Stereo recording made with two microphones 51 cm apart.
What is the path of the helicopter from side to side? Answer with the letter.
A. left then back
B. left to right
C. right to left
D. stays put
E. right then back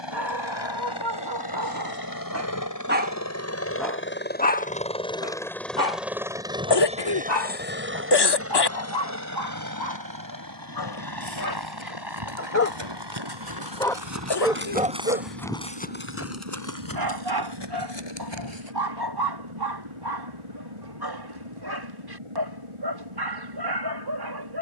B.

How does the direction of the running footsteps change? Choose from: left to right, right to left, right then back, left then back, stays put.
right to left.